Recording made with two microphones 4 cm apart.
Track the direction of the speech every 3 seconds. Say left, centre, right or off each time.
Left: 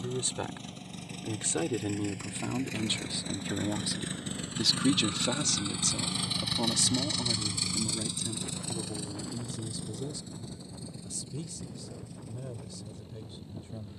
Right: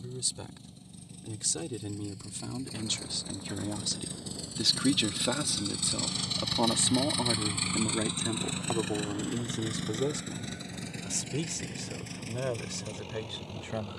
left, centre, right, right, right.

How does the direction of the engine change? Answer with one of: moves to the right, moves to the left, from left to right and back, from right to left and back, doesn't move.
moves to the right.